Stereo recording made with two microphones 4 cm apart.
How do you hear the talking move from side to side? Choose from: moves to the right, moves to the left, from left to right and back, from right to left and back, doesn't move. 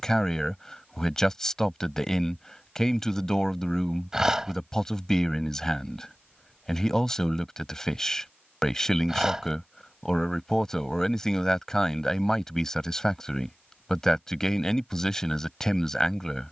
doesn't move.